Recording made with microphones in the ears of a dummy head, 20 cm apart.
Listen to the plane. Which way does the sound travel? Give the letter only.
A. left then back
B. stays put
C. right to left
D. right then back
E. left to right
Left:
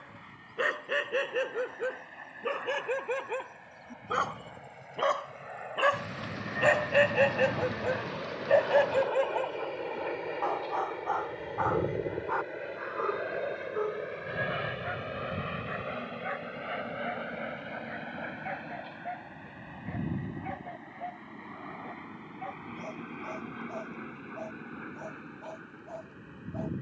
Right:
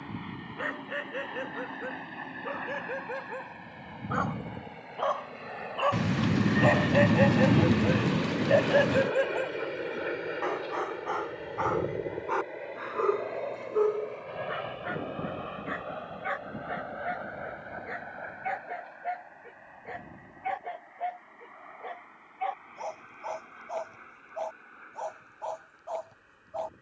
C.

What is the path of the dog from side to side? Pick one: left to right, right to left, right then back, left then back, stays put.
left to right.